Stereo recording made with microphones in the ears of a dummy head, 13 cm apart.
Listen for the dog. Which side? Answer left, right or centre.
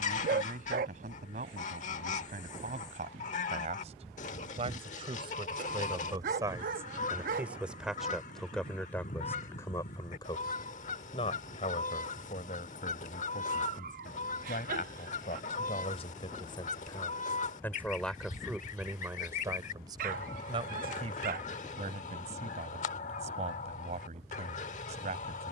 right.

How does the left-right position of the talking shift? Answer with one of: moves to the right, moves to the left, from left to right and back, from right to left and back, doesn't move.
from right to left and back.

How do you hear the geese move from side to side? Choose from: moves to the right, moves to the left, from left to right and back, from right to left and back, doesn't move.
doesn't move.